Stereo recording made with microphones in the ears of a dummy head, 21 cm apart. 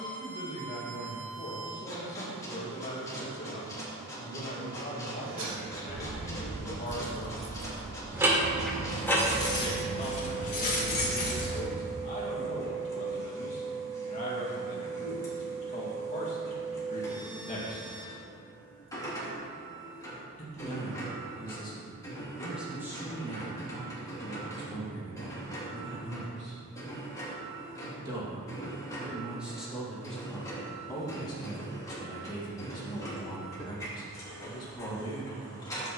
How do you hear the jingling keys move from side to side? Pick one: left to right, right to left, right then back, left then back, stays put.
right to left.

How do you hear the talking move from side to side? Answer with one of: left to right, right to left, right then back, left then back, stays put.
right then back.